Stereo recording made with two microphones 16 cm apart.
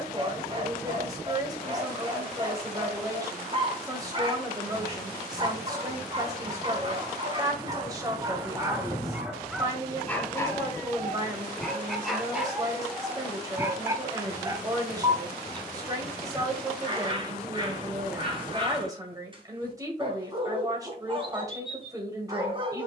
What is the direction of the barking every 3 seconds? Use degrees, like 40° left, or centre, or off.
30° right, 30° right, 30° right, 10° left, 10° right, 30° right, 30° right, 30° right.